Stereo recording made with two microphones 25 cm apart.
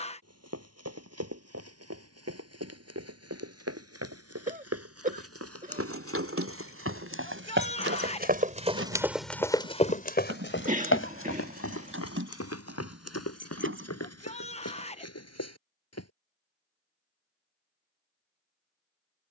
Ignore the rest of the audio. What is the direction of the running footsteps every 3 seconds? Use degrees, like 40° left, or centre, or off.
80° right, 70° right, 50° right, 40° left, 80° left, 80° left, off.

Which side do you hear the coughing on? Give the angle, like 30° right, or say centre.
30° right.